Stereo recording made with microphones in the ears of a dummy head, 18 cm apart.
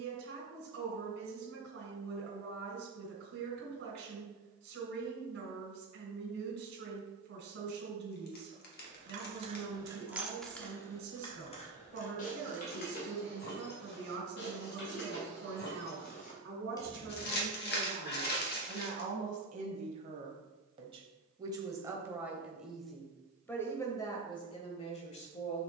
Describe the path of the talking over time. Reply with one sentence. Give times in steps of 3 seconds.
You can hear the talking on the right from 0 s, in the centre from 21 s and on the left from 24 s.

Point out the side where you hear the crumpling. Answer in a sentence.
In this clip you hear the crumpling on the left.